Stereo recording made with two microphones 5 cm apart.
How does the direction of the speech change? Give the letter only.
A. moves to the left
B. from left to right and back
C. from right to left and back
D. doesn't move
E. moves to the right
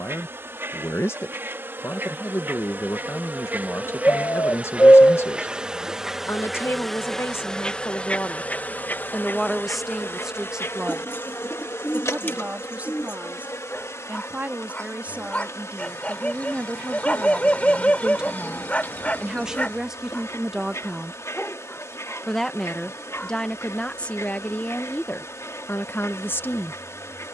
B.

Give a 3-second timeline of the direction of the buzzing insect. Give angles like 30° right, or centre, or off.
50° right, 30° right, 10° left, 60° left, 70° left, 80° left, 80° left, 80° left, 80° left.